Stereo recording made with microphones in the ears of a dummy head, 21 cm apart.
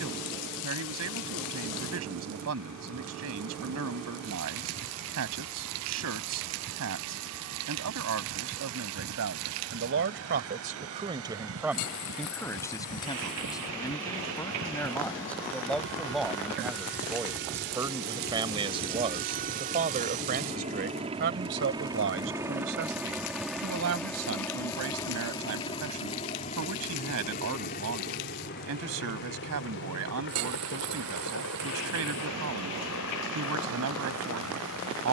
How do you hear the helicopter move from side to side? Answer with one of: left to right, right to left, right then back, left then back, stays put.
right to left.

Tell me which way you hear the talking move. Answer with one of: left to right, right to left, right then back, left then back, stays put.
left then back.